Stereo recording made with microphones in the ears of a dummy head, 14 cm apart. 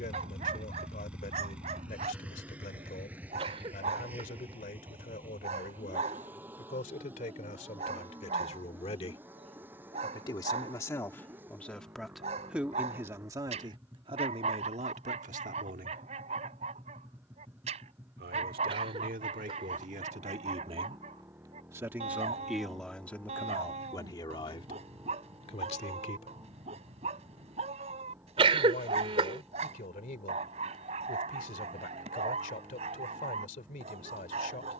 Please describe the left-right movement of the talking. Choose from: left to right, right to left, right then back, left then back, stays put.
right then back.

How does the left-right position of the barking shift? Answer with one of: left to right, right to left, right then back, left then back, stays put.
stays put.